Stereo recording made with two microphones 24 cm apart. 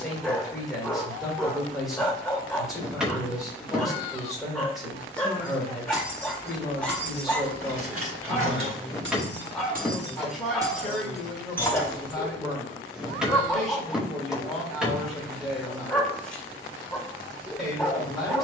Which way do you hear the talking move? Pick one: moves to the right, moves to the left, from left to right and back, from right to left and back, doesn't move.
doesn't move.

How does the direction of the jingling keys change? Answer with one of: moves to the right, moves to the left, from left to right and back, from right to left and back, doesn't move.
from left to right and back.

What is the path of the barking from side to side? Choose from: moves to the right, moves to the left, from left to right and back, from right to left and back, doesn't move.
doesn't move.